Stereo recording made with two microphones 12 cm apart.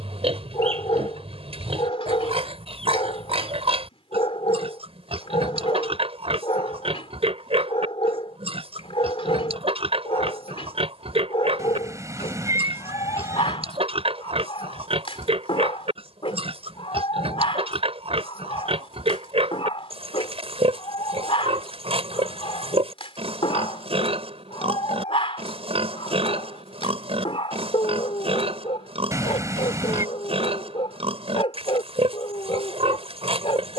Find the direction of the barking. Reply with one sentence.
In this clip you hear the barking on the left.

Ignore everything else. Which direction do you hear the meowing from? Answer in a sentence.
You can hear the meowing on the right.